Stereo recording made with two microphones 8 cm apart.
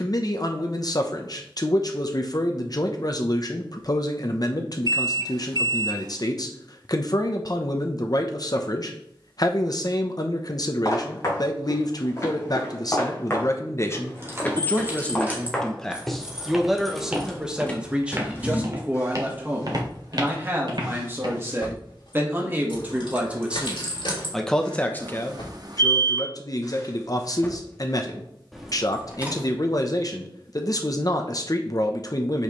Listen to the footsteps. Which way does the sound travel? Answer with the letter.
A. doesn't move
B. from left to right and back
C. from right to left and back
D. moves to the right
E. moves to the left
D.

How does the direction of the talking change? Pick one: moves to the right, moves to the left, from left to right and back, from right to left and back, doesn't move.
from left to right and back.